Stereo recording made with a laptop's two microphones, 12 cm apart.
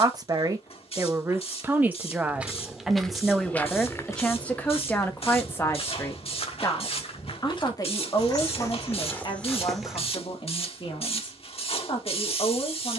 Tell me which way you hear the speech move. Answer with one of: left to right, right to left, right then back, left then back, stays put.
right to left.